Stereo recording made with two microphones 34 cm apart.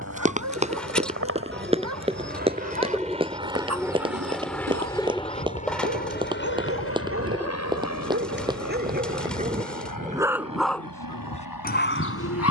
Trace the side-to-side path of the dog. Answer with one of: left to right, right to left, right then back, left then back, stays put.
right to left.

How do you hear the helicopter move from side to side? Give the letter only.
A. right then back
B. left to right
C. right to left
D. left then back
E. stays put
C.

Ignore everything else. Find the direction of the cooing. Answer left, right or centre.
centre.